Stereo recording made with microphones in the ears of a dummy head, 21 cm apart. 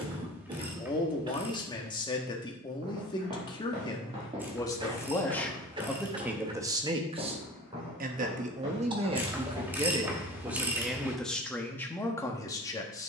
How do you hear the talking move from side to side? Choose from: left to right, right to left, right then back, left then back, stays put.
right then back.